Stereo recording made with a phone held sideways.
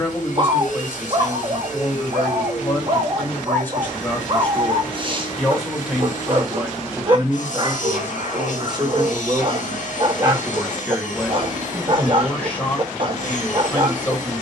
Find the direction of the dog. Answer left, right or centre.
right.